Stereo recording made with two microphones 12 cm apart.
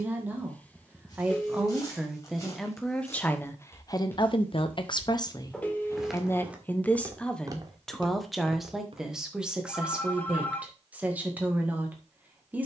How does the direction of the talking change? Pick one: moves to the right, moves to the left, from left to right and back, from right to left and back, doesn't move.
from right to left and back.